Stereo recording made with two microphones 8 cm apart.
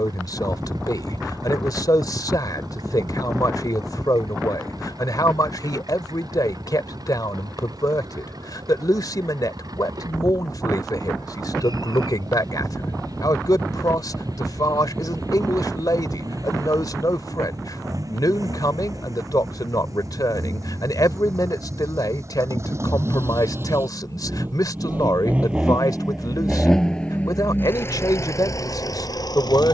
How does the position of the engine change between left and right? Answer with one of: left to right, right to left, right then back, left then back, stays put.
right to left.